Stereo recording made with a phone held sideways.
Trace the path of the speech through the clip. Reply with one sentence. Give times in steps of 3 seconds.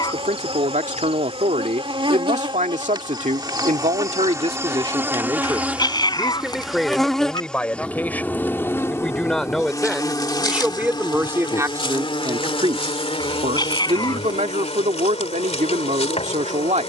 In this clip you hear the speech on the right from 0 s, in the centre from 6 s and on the right from 12 s.